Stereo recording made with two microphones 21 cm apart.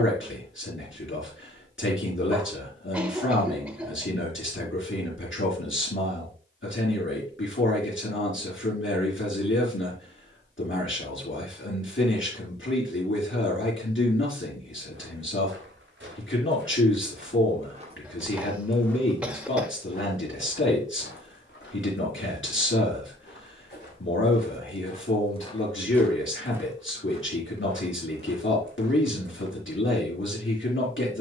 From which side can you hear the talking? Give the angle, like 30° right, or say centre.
70° left.